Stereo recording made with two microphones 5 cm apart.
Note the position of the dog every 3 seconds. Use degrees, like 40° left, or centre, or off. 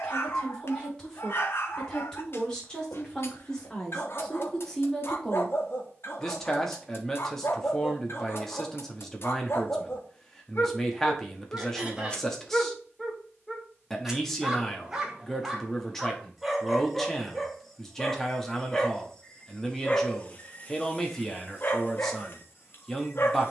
50° left, 50° left, 50° left, 50° left, centre, centre, 20° left, 40° left.